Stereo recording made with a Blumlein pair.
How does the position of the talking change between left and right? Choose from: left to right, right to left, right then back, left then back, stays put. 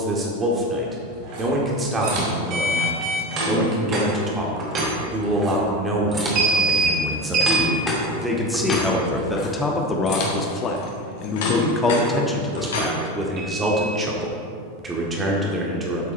left then back.